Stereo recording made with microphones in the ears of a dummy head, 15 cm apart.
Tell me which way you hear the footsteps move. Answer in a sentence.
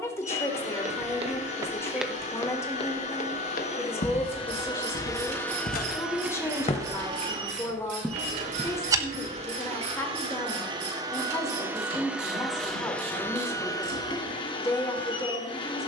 In this clip you hear the footsteps go left and come back.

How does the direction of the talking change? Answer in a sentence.
You can hear the talking stay put.